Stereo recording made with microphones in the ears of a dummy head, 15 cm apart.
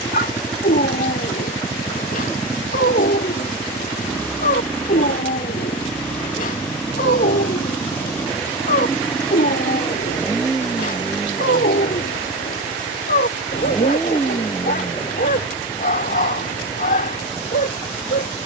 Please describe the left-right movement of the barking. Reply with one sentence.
In this clip you hear the barking stay in one place.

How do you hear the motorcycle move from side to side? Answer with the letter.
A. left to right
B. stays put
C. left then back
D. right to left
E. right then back
B.